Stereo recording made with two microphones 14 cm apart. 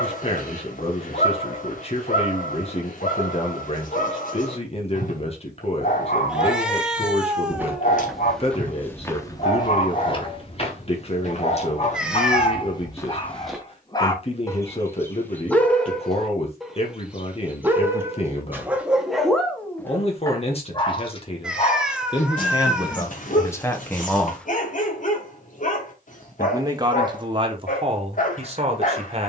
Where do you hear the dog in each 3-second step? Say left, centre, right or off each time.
left, left, left, left, left, centre, centre, left, left, left.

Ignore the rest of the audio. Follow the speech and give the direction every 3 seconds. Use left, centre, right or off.
left, left, left, left, left, left, left, left, centre, right.